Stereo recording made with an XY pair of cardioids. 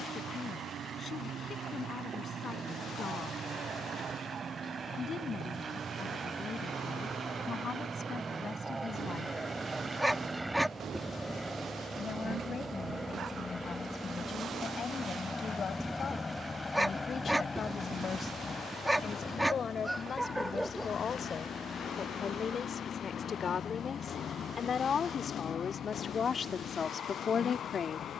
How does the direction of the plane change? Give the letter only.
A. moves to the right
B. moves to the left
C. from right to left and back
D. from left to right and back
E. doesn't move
B.